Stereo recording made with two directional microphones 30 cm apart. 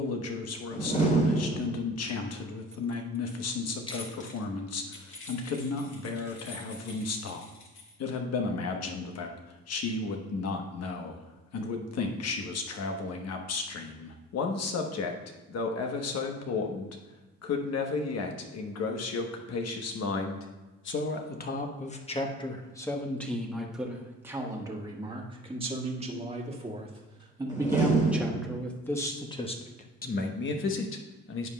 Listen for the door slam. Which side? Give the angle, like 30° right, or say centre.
20° left.